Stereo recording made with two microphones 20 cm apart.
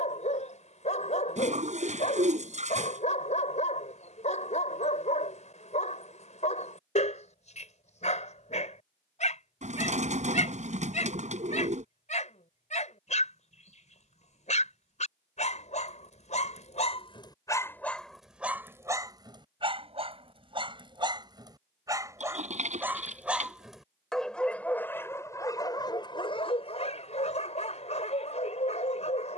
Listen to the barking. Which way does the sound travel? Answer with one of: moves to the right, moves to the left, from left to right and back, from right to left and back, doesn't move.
from left to right and back.